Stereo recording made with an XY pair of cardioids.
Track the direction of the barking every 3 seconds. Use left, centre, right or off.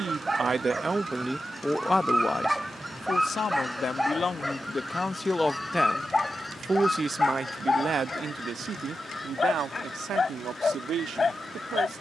centre, centre, left, left.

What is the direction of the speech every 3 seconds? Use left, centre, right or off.
centre, left, right, right.